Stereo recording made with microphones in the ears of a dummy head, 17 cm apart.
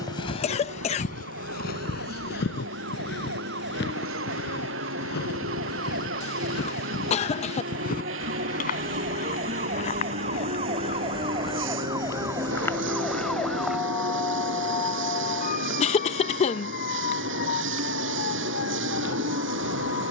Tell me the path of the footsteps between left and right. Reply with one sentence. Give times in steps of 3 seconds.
You can hear the footsteps on the left from 0 s, in the centre from 12 s and not at all from 15 s.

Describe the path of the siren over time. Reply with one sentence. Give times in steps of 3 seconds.
You can hear the siren on the right from 0 s, in the centre from 12 s and on the left from 15 s.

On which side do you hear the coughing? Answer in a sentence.
You can hear the coughing on the left.